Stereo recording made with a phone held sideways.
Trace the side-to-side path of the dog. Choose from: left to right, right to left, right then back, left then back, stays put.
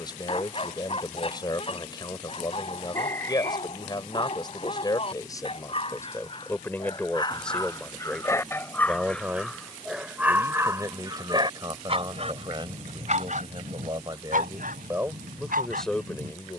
left to right.